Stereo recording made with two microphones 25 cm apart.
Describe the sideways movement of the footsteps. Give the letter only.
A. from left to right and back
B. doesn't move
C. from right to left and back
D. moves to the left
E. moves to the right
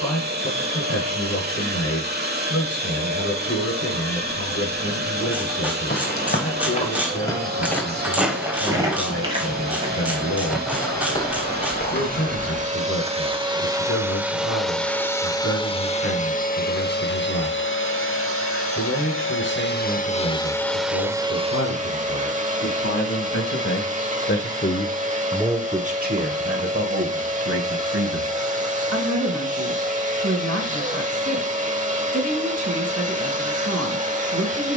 A.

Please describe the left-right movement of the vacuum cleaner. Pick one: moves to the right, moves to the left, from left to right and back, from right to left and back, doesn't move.
from right to left and back.